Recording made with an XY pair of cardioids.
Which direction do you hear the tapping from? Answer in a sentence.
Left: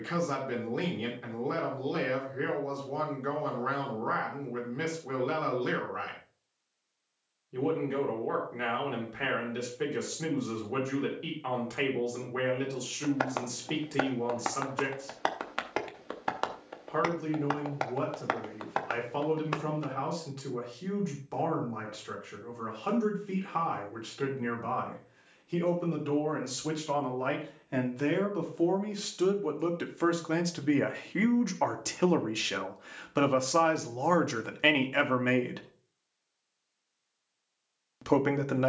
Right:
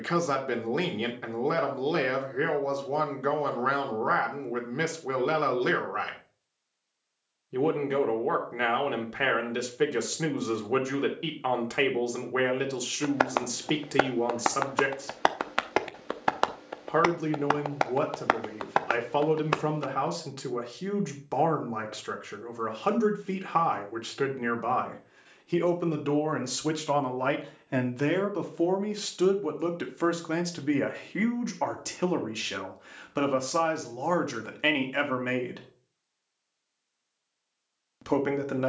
In this clip you hear the tapping on the right.